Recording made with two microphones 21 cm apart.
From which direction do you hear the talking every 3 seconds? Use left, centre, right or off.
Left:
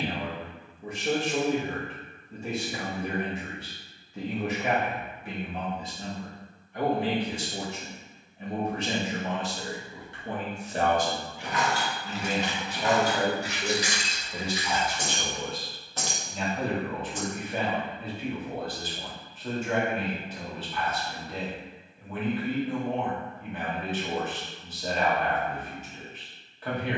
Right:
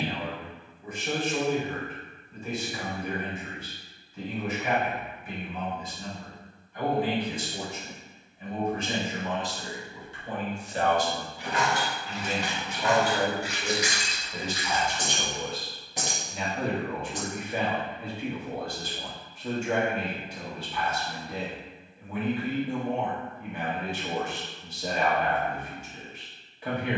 left, left, left, left, left, centre, centre, centre, centre.